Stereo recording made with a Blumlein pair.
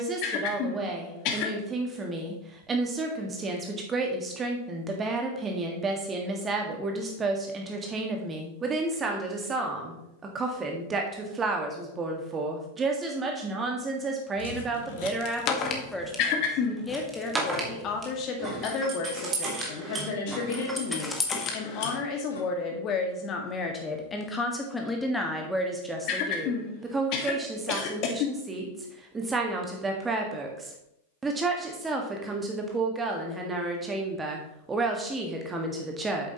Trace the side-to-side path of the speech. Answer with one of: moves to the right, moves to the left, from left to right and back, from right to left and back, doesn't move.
from right to left and back.